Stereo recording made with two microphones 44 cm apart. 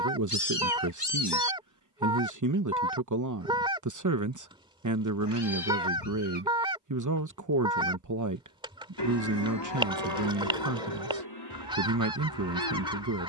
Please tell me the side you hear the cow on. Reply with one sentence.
In this clip you hear the cow on the left.